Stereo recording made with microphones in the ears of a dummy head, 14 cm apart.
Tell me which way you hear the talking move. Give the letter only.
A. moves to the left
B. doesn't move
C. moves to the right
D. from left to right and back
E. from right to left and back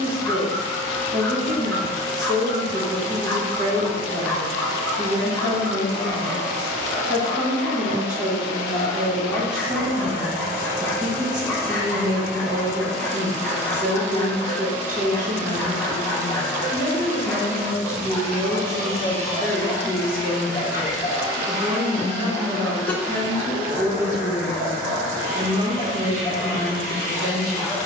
E.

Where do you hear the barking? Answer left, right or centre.
centre.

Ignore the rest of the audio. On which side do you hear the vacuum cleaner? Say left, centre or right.
right.